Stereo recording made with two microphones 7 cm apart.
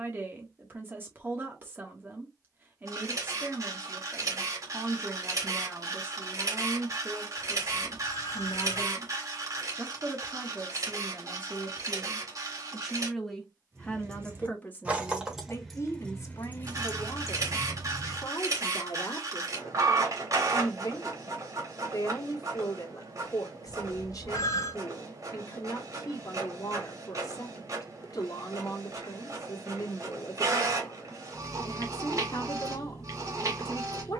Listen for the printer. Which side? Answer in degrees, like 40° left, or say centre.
50° right.